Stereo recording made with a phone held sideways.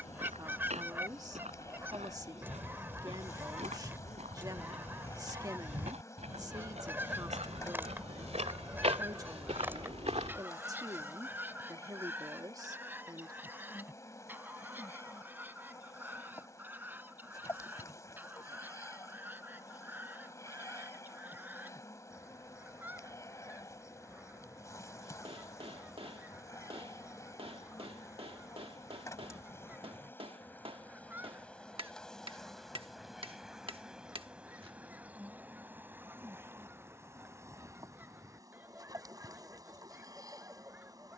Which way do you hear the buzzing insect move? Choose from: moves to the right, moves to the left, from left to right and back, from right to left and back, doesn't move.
moves to the right.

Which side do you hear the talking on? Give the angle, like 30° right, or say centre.
20° right.